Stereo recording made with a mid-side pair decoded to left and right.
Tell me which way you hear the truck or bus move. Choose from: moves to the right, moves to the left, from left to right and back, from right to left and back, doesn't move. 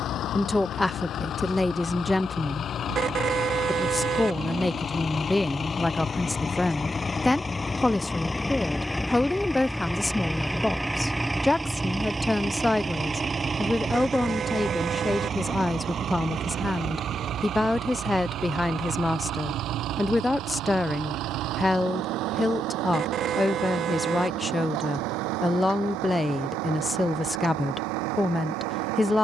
moves to the right.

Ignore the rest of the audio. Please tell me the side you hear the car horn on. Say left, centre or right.
right.